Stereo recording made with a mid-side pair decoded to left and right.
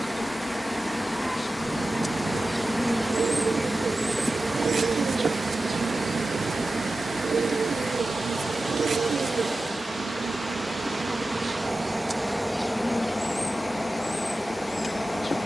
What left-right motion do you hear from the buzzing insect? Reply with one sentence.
You can hear the buzzing insect go right and come back.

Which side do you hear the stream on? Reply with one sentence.
You can hear the stream in the centre.